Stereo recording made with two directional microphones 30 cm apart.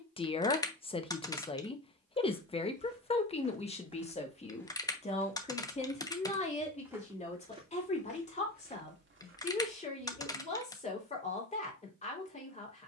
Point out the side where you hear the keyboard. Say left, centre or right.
centre.